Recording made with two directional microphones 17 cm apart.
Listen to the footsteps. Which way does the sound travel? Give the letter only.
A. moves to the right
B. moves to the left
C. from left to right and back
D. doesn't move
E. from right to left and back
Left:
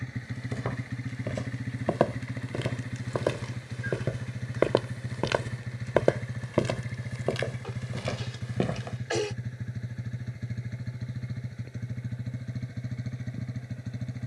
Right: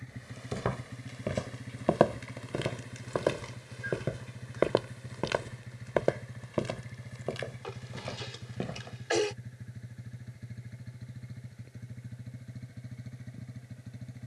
B.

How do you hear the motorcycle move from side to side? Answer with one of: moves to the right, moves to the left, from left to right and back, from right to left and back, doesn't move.
doesn't move.